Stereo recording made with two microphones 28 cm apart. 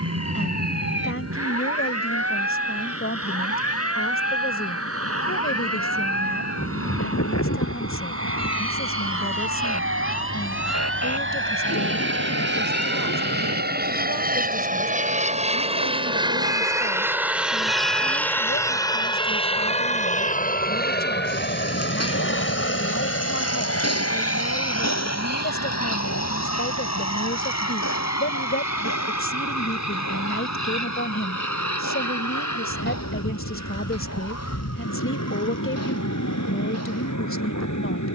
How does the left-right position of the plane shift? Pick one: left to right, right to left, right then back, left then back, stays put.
right to left.